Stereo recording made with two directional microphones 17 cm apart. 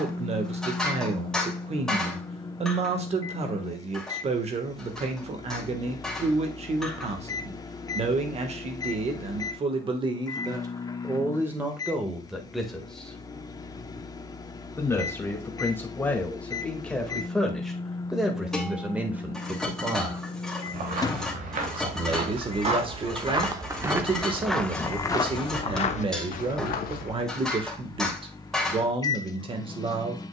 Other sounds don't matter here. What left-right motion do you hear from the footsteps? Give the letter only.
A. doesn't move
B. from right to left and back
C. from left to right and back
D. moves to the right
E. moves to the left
E.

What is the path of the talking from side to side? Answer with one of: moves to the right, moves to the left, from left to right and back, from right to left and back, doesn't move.
from right to left and back.